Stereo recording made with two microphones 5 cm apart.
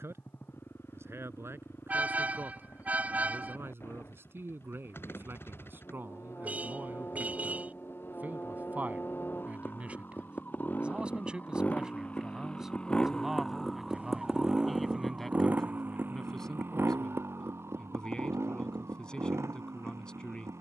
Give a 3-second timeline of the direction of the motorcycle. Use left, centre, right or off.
left, left, left, left, centre, right, right.